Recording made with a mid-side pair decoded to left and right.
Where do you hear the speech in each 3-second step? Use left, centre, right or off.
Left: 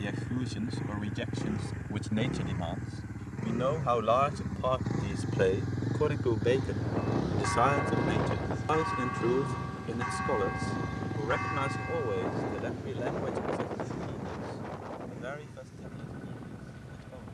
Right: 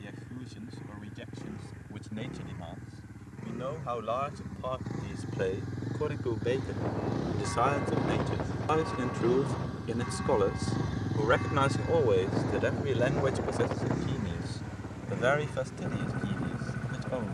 left, left, centre, right, right, right.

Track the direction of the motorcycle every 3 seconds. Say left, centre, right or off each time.
left, left, centre, right, right, right.